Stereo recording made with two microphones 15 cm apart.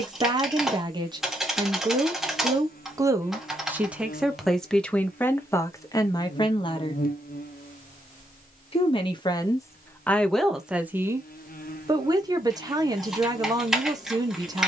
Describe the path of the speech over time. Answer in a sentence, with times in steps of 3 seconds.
You can hear the speech on the right from 0 s, in the centre from 3 s, on the left from 6 s, in the centre from 9 s and on the right from 12 s.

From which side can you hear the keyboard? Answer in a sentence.
In this clip you hear the keyboard in the centre.